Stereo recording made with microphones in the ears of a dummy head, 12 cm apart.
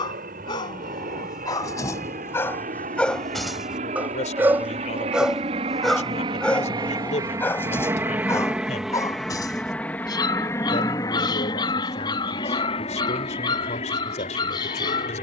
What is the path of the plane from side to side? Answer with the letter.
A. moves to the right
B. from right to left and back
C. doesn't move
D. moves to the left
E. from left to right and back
D.